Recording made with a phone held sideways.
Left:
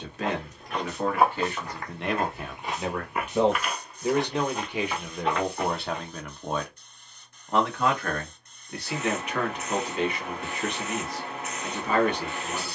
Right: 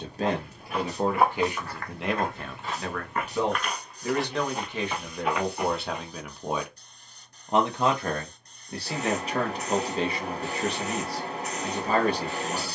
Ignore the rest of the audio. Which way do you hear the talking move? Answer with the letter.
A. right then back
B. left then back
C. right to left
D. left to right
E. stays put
B.